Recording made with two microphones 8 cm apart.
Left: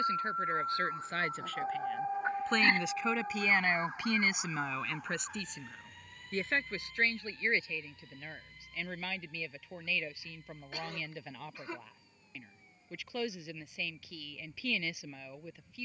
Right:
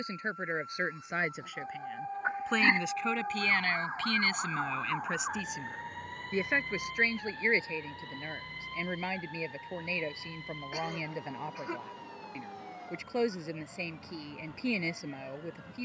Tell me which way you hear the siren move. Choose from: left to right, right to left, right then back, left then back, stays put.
left to right.